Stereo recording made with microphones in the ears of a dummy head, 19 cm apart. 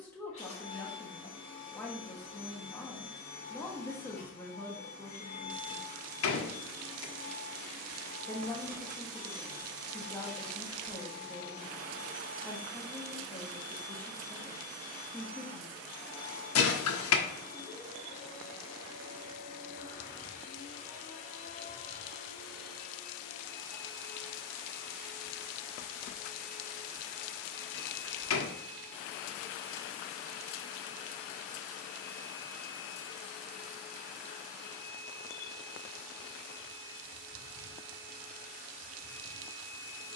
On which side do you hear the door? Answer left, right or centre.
left.